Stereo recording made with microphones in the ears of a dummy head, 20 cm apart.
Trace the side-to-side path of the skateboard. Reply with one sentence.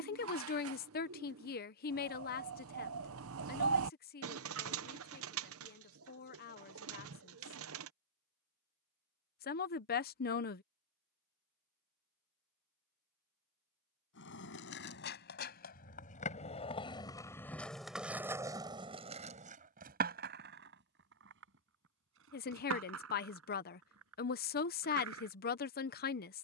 In this clip you hear the skateboard move to the right.